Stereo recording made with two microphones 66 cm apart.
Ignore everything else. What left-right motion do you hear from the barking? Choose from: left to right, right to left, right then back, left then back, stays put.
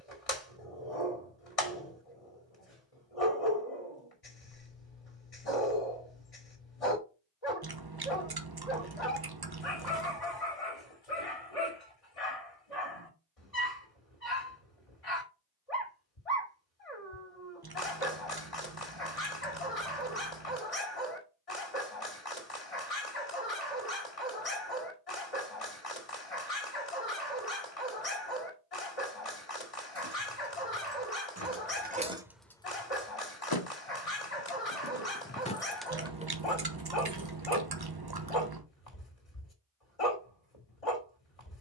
stays put.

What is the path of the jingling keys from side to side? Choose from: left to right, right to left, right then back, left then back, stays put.
left then back.